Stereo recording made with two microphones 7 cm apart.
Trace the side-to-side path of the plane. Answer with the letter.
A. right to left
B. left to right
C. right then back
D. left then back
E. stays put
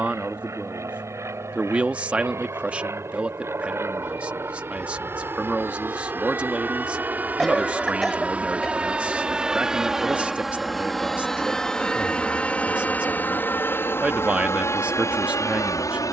A.